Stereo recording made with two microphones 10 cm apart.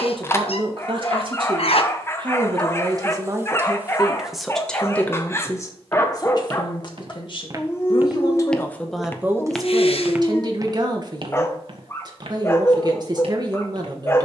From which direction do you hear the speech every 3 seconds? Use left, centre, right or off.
right, centre, left, right, right.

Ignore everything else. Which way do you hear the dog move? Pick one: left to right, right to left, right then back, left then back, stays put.
stays put.